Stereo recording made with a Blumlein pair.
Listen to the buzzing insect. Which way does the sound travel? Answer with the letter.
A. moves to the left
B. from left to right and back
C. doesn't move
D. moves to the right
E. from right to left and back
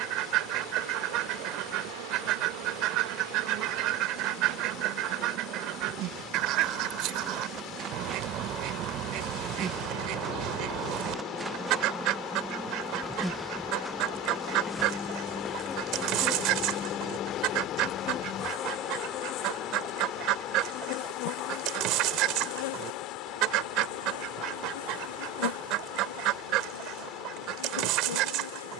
A.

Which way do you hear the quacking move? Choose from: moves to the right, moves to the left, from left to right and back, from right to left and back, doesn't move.
doesn't move.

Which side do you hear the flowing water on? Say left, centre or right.
left.